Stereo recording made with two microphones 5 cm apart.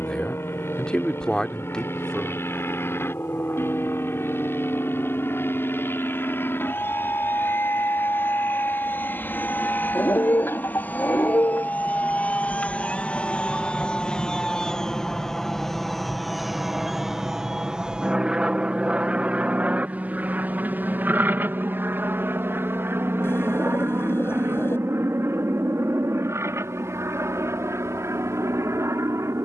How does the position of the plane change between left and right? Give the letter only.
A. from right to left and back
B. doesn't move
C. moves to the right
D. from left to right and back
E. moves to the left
C.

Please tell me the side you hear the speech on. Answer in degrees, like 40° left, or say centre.
20° left.